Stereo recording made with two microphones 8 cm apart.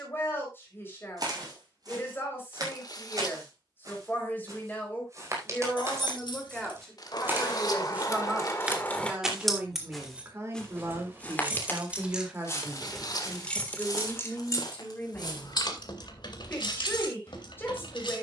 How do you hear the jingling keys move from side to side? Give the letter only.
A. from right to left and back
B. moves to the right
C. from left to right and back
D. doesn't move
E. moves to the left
C.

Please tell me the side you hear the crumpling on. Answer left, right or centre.
left.